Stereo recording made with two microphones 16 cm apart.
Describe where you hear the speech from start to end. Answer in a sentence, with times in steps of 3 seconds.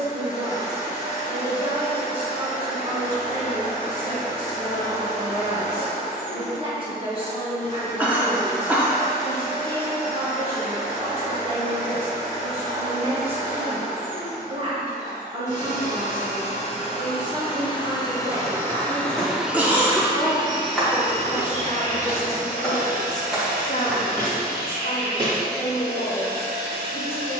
You can hear the speech on the right from 0 s, in the centre from 18 s and on the left from 21 s.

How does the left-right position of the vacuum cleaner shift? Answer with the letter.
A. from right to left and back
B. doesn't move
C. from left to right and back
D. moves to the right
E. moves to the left
D.